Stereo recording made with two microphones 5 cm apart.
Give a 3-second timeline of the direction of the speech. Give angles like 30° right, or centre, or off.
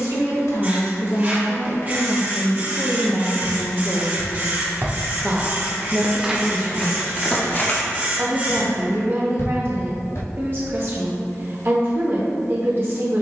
50° left, centre, 40° right, 40° right, 40° right.